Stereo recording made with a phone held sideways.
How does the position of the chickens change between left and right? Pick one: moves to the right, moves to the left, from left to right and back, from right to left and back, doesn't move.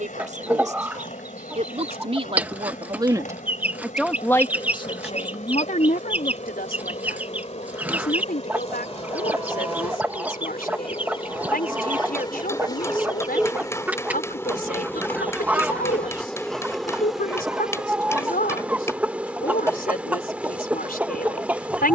doesn't move.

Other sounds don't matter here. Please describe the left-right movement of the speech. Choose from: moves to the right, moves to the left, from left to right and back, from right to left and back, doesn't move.
moves to the left.